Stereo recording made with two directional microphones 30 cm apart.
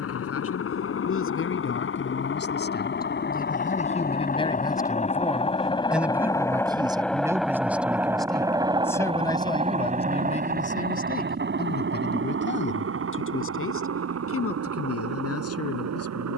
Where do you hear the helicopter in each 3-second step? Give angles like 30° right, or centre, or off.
50° left, 30° left, centre, 30° right, 50° right, 50° right.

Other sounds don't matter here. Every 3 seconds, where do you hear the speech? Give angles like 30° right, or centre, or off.
40° left, 20° left, 10° right, 20° left, 40° left, 50° left.